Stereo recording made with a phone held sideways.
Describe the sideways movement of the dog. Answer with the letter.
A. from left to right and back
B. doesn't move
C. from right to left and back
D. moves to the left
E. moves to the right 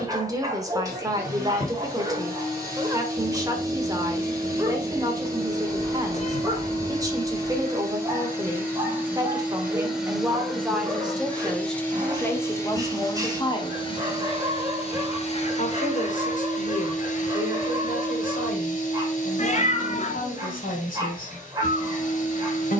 B.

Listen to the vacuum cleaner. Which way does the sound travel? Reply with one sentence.
In this clip you hear the vacuum cleaner go from the right side to the left.